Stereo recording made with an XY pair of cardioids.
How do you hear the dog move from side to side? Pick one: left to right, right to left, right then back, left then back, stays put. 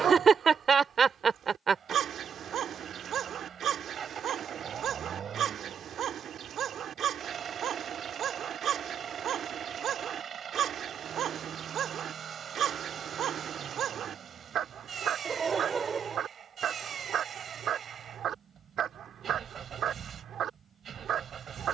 stays put.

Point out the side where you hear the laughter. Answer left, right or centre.
right.